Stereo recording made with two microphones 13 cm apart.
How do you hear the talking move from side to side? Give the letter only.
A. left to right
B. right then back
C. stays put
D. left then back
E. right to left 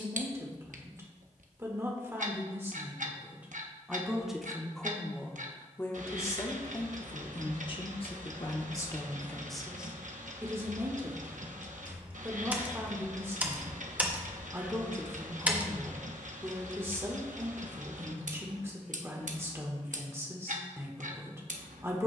D.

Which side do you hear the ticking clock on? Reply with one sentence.
You can hear the ticking clock on the right.